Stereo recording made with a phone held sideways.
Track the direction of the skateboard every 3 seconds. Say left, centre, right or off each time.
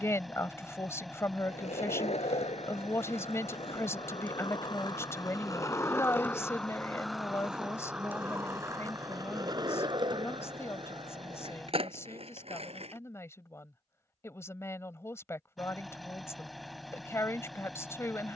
left, left, centre, right, right, off.